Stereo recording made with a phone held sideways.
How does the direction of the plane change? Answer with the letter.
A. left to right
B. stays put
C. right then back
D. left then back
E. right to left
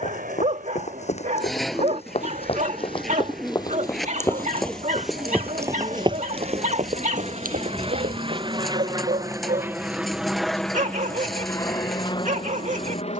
E.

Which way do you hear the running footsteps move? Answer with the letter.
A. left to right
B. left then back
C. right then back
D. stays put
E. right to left
A.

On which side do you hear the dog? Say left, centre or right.
right.